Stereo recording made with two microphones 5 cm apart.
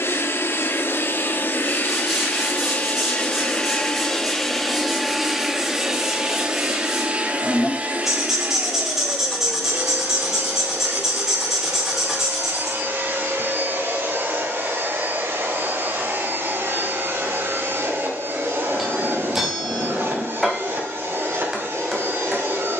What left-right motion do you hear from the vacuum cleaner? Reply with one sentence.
You can hear the vacuum cleaner move to the right.